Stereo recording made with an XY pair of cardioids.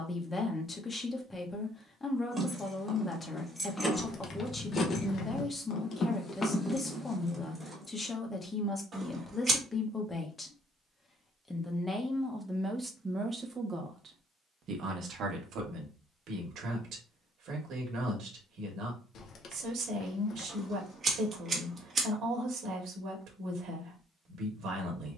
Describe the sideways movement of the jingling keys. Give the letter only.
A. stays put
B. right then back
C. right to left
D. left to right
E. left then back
E.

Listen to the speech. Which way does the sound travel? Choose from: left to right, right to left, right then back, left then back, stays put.
left to right.